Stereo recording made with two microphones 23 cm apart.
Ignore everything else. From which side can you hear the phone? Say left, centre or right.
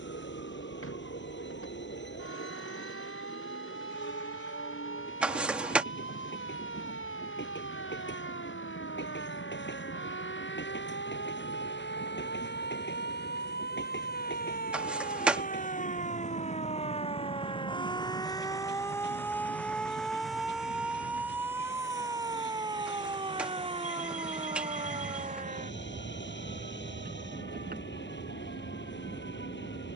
centre.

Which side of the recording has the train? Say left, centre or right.
left.